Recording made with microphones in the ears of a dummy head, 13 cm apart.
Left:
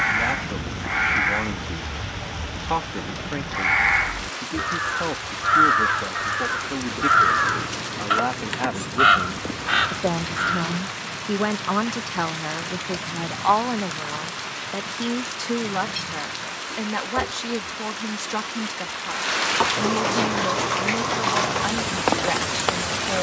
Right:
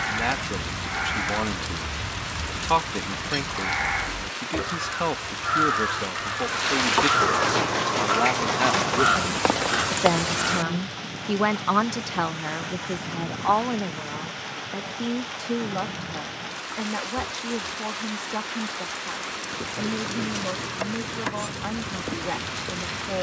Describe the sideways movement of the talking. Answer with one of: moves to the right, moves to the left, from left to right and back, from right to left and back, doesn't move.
moves to the left.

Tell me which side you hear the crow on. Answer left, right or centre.
left.